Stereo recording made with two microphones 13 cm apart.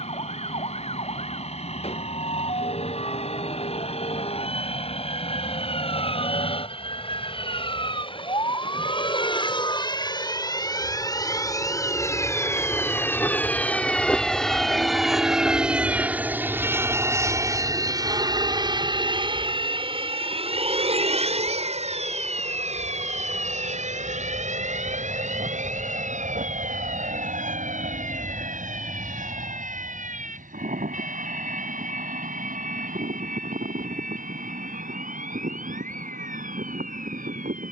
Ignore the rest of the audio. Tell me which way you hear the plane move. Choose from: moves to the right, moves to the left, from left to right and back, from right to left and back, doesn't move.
moves to the right.